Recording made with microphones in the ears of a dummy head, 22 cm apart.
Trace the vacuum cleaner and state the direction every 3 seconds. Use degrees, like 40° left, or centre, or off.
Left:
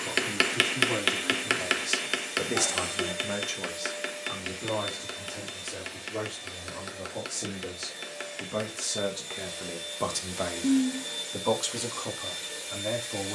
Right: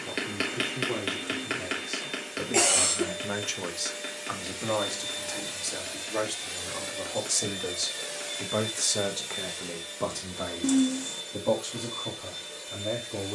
30° left, 10° right, 40° right, 20° left, 30° left.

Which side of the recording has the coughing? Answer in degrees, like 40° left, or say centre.
80° right.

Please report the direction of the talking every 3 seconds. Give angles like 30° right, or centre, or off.
60° left, 40° right, 40° right, 30° left, 60° left.